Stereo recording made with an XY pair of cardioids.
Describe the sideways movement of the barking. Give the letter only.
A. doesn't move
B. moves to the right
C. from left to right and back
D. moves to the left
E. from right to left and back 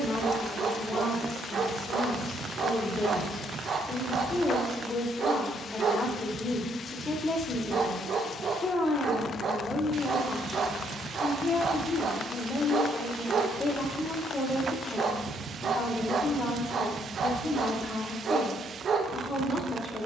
A.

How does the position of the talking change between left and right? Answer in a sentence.
You can hear the talking stay put.